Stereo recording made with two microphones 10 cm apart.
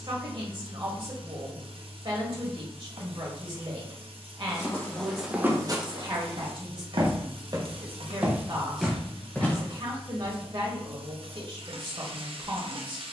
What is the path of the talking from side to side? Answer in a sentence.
You can hear the talking stay in one place.